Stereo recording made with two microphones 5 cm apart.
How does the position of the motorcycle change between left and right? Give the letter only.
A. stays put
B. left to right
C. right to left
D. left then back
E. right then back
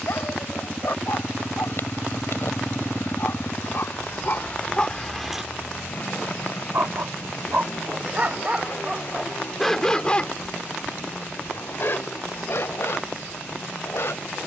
C.